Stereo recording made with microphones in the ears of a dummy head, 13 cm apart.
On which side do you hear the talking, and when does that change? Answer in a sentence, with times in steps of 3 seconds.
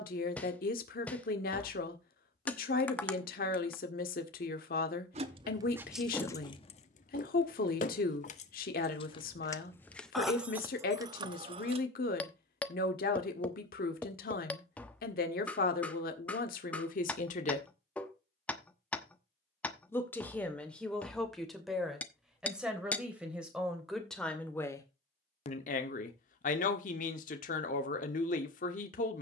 In this clip you hear the talking on the left from 0 s, in the centre from 18 s and on the left from 24 s.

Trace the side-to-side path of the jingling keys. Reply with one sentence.
You can hear the jingling keys go left and come back.